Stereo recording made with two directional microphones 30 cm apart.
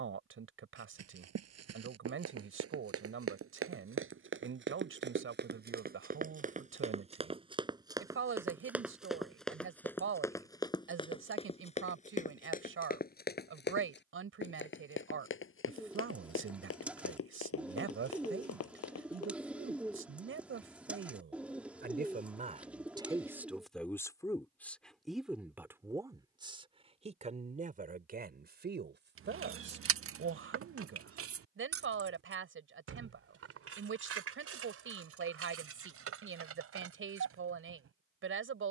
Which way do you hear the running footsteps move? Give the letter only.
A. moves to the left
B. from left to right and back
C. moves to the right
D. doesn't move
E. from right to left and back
A.